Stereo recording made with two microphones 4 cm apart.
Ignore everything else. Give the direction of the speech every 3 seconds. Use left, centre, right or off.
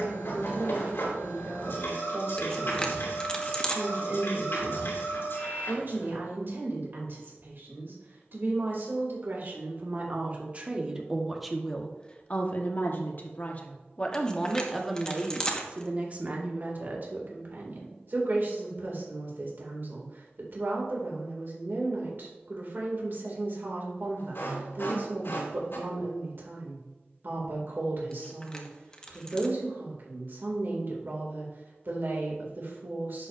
right, right, right, right, left, right, right, right, right, right, right.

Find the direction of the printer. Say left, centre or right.
left.